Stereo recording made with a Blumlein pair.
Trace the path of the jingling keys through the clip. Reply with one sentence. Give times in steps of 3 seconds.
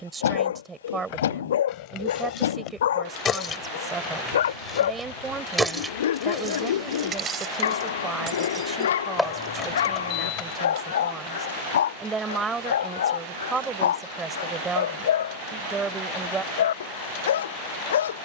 In this clip you hear the jingling keys on the left from 0 s, in the centre from 3 s, on the right from 6 s, on the left from 9 s and not at all from 12 s.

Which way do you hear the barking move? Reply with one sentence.
In this clip you hear the barking stay put.